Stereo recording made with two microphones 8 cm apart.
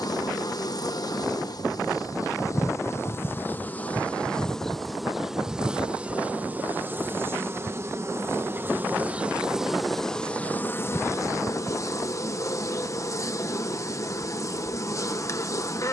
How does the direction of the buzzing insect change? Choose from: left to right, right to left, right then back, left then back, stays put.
right then back.